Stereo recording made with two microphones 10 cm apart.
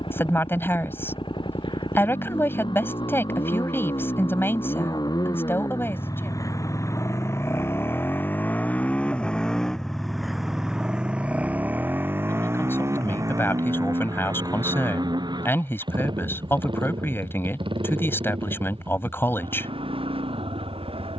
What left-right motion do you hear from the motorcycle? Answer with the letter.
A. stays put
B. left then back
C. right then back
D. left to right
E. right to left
D.